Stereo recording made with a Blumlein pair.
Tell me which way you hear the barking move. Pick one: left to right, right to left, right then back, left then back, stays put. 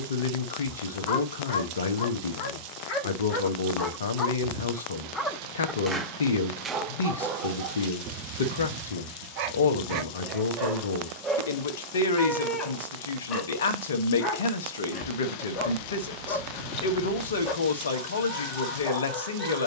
right then back.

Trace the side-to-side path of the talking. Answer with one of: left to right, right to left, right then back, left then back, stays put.
stays put.